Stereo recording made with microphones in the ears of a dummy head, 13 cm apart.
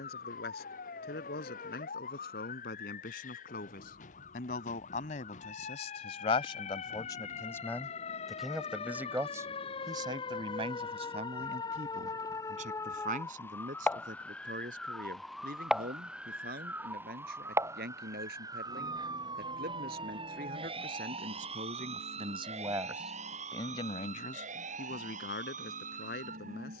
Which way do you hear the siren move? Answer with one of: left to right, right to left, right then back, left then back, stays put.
left to right.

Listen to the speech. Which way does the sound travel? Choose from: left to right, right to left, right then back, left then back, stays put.
right then back.